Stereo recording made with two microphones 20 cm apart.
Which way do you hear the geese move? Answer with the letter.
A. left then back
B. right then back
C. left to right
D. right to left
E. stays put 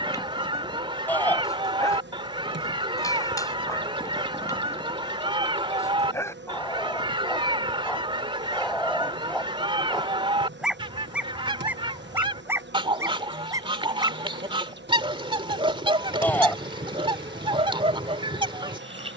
E.